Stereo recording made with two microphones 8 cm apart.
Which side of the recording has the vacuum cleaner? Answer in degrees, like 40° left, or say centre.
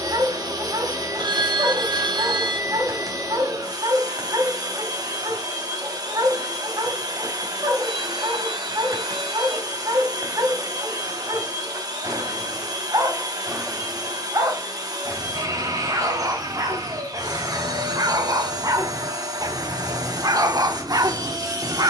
50° right.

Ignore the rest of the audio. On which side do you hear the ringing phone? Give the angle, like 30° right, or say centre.
70° right.